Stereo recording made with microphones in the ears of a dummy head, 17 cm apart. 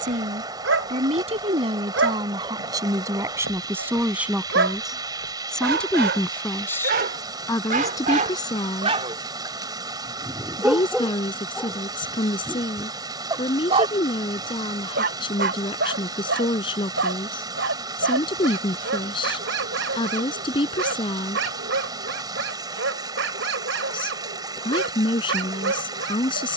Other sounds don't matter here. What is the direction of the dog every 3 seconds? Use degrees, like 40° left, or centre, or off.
80° right, 70° right, 50° right, 10° right, 20° right, 70° right, 70° right, 70° right, 70° right.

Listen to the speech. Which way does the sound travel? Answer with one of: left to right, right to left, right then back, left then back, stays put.
right to left.